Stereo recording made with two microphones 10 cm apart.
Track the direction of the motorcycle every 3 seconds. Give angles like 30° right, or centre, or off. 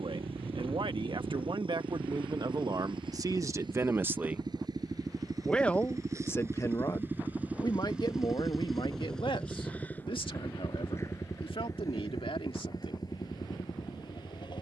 60° right, 50° right, 20° right, 20° left, 40° left.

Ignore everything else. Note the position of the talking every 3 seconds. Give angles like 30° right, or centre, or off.
50° right, 20° right, 40° left, 60° left, 70° left.